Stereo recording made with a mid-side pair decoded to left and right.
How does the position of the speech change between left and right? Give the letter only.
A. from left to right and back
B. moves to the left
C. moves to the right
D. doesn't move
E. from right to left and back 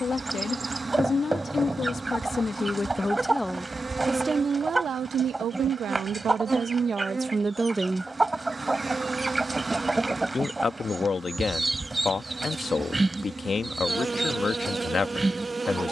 A.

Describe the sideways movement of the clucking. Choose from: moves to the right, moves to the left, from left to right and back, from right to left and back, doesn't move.
doesn't move.